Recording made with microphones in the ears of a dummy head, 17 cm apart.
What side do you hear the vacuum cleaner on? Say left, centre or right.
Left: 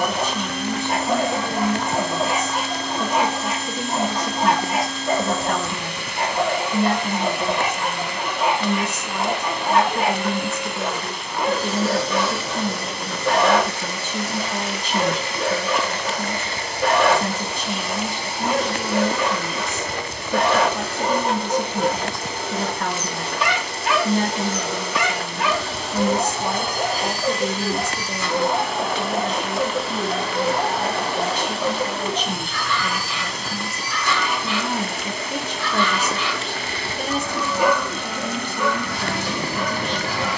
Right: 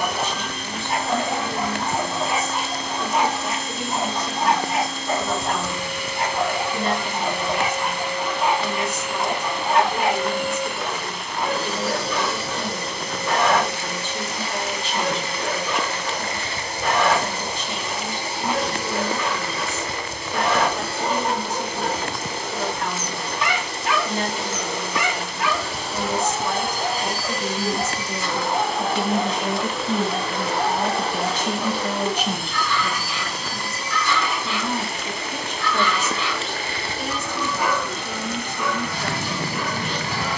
left.